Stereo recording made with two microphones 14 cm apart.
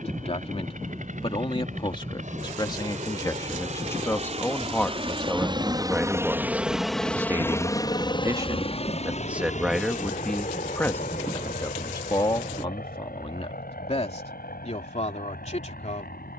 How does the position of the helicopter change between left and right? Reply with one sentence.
In this clip you hear the helicopter travel towards the left.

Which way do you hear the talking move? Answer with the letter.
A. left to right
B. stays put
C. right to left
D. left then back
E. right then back
E.